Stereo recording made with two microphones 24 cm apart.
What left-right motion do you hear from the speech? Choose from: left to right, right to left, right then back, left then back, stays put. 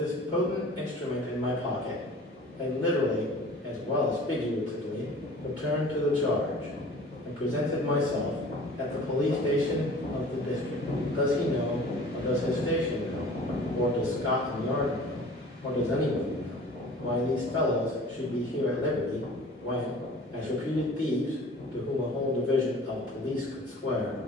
stays put.